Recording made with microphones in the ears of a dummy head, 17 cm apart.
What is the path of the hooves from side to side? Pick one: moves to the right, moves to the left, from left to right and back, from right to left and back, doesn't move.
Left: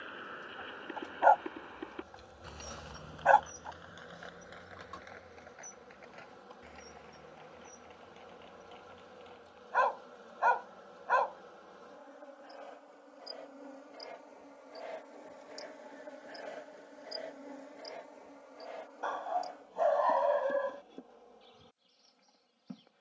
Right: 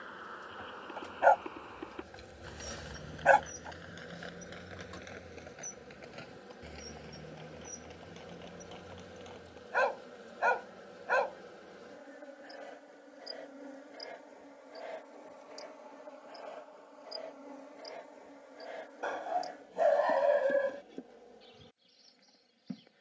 moves to the right.